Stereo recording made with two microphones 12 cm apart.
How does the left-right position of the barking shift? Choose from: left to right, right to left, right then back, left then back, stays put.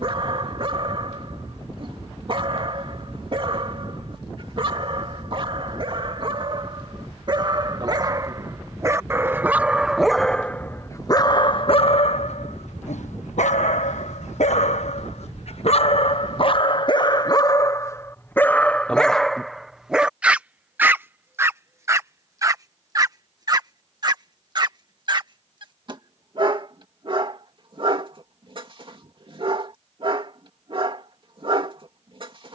left then back.